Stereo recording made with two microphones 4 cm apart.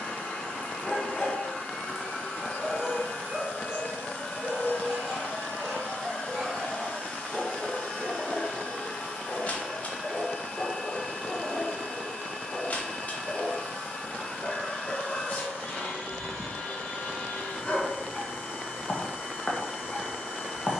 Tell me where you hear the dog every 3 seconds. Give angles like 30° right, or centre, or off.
centre, 20° right, 10° left, 30° left, 30° left, 30° left, 30° left.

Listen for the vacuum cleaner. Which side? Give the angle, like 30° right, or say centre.
60° left.